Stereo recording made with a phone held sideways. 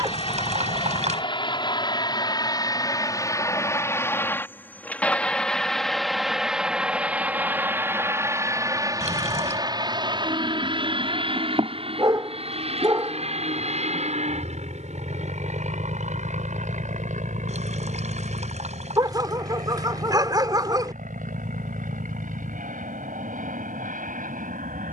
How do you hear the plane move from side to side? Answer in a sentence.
In this clip you hear the plane go from the left side to the right.